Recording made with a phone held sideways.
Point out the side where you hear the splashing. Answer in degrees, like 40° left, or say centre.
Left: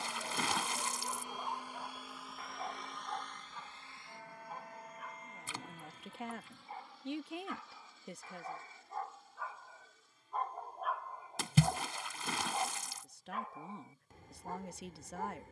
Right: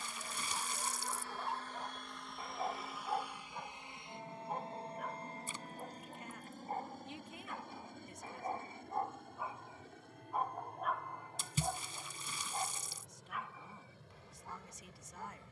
80° left.